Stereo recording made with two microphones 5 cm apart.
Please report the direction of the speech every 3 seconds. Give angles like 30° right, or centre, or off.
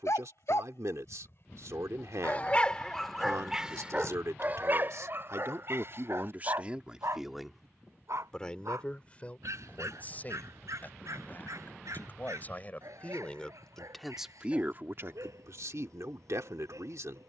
70° right, 60° right, centre, 30° left, 10° left, 70° right.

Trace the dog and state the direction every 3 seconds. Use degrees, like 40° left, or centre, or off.
40° left, 30° right, 60° right, 70° right, 80° right, 80° right.